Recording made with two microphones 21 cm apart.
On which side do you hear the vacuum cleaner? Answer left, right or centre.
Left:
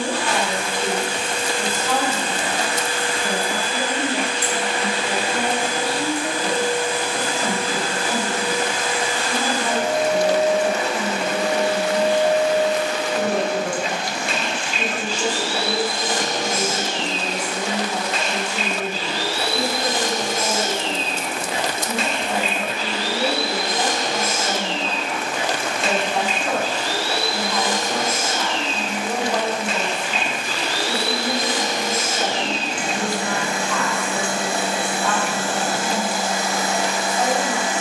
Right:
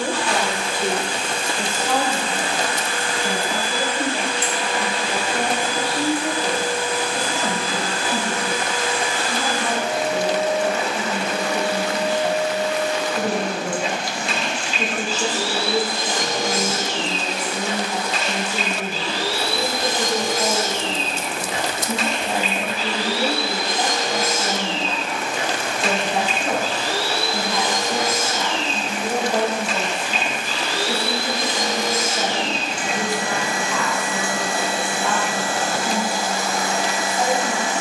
left.